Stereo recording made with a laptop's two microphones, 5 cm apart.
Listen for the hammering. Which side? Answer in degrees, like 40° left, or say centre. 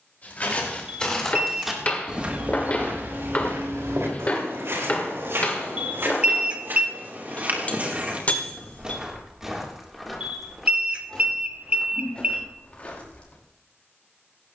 30° left.